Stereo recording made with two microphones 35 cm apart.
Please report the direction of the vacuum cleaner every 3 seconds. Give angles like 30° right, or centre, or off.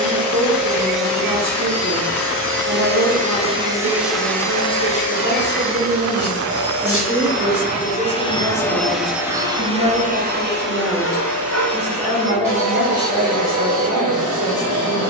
50° right, 10° left, 30° left, 30° right, 50° right.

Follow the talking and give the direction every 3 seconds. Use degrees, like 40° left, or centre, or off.
50° right, 50° right, 10° right, centre, 30° right.